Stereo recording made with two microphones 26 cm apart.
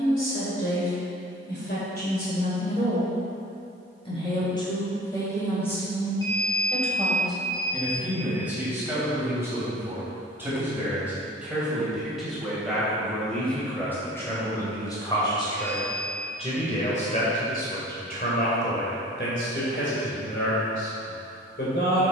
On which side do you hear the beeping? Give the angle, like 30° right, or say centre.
60° left.